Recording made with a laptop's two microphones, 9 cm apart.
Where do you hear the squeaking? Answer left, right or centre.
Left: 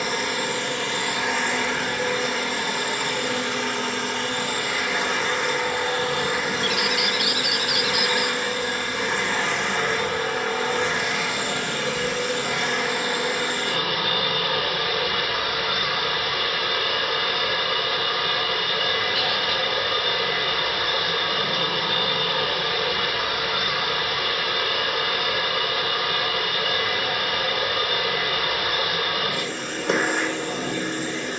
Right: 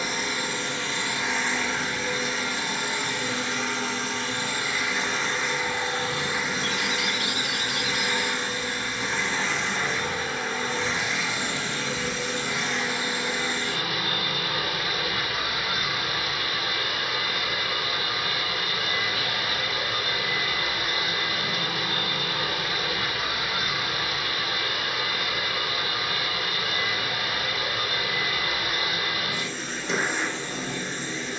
left.